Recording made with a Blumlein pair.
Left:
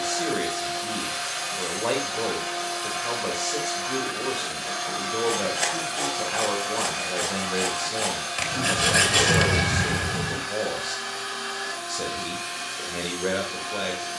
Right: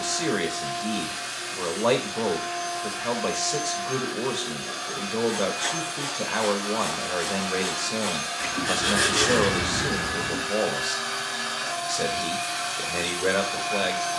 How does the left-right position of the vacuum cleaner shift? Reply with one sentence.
In this clip you hear the vacuum cleaner go from the left side to the right.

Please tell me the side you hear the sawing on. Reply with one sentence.
In this clip you hear the sawing on the left.